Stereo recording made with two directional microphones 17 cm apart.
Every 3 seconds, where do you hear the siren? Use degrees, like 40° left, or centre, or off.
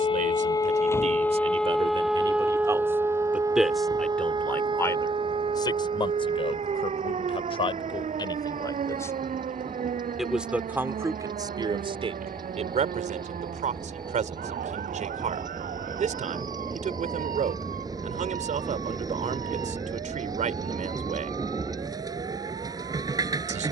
10° left, 30° right, 40° right, 50° right, 50° right, 50° right, 60° right, 60° right.